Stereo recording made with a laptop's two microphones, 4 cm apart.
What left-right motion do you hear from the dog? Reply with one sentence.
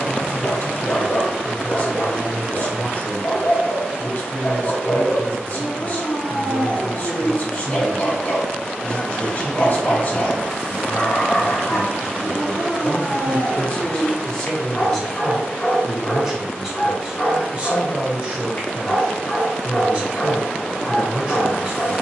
You can hear the dog stay put.